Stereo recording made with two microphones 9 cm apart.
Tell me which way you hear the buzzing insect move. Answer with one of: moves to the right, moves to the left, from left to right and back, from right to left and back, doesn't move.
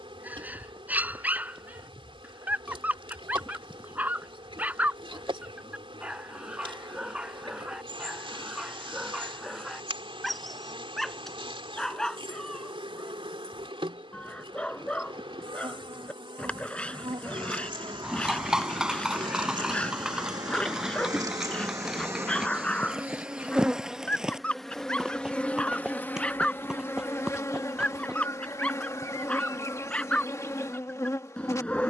moves to the left.